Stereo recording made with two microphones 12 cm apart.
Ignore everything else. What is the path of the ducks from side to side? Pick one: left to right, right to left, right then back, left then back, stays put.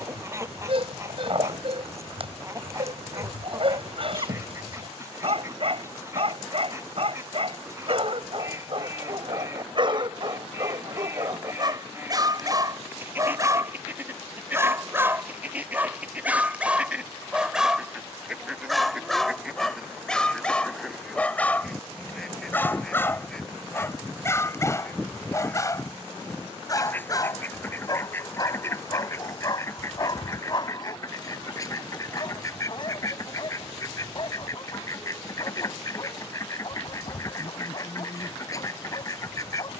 right to left.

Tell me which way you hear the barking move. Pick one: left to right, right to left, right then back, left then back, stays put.
right to left.